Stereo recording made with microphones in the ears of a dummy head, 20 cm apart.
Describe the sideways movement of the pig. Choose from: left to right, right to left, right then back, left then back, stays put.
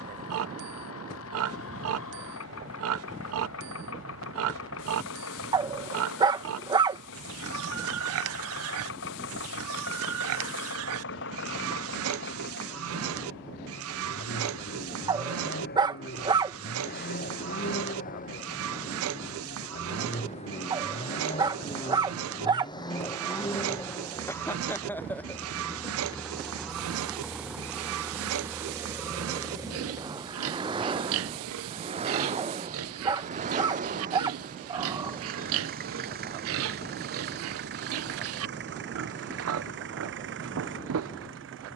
stays put.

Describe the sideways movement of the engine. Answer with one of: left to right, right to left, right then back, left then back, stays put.
left to right.